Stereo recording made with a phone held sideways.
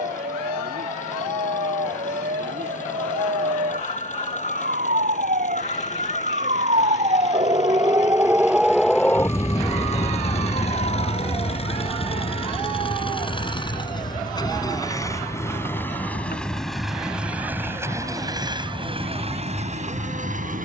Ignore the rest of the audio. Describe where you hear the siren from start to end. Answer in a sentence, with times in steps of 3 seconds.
In this clip you hear the siren on the right from 0 s and on the left from 9 s.